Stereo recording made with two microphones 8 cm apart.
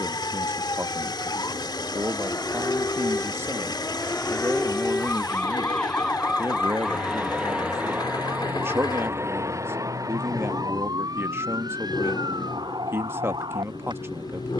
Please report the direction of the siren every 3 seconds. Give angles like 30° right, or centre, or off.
50° left, 30° left, 10° right, 50° right, 60° right.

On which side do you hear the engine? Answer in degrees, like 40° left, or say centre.
70° left.